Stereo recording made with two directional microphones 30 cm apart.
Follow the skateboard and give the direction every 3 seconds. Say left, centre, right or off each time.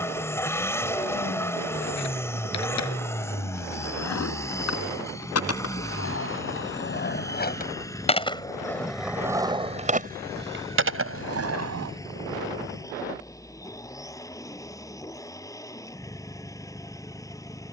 left, left, left, right, off, off.